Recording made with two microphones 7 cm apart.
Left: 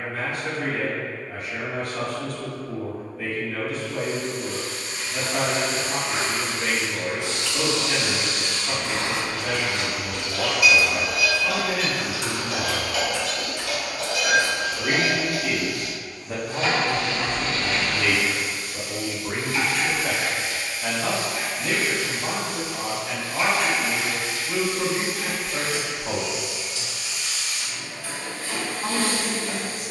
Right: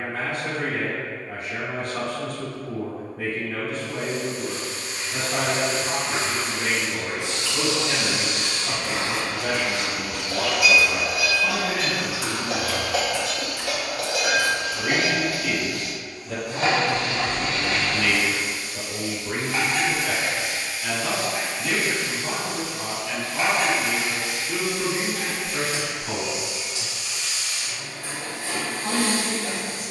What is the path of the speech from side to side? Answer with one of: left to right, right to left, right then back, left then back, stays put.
right to left.